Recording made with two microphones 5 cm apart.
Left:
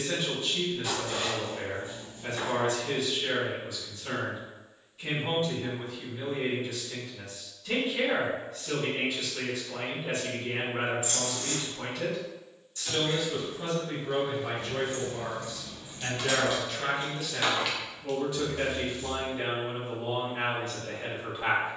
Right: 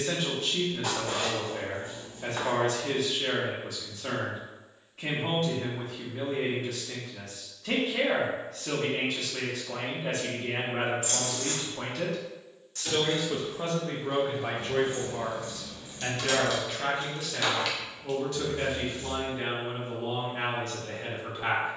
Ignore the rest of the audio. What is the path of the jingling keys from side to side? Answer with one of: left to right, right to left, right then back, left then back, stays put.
left then back.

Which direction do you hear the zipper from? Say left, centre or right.
right.